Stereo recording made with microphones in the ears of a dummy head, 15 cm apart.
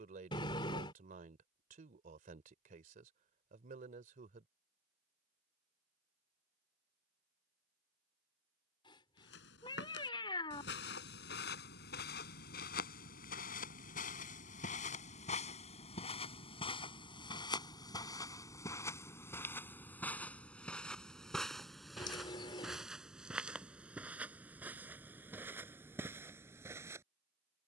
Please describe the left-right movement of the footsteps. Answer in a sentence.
You can hear the footsteps travel towards the right.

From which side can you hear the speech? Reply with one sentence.
You can hear the speech on the right.